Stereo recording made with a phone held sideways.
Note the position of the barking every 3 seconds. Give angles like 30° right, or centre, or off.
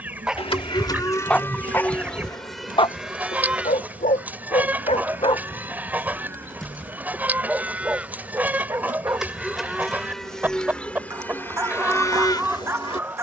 10° left, 50° left, 10° right, 20° right, 20° right.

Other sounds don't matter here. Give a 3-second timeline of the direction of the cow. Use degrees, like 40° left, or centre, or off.
10° left, 10° right, 10° right, 10° left, 30° left.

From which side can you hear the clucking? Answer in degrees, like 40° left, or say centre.
10° right.